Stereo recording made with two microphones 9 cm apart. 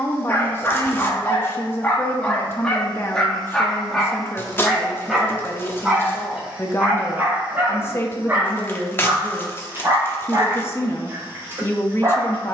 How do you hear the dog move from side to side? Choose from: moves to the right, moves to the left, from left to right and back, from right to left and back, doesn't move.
moves to the right.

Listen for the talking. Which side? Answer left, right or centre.
left.